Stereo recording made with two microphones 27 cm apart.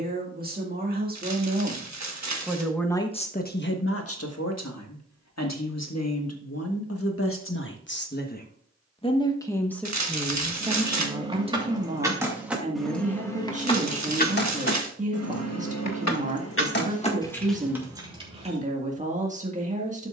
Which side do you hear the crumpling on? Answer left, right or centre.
right.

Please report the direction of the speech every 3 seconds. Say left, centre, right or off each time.
right, left, left, centre, right, right, right.